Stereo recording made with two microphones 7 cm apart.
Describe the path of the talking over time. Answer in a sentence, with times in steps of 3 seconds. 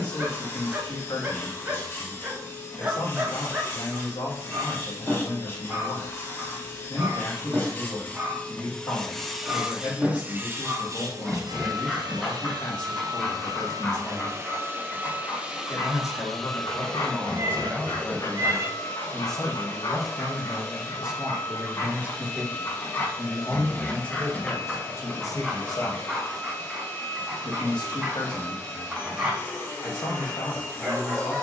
In this clip you hear the talking on the left from 0 s, in the centre from 18 s and on the left from 24 s.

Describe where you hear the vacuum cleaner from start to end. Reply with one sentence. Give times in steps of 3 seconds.
You can hear the vacuum cleaner on the left from 0 s, on the right from 9 s, in the centre from 15 s and on the left from 18 s.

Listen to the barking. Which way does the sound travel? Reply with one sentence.
In this clip you hear the barking move from right to left and back again.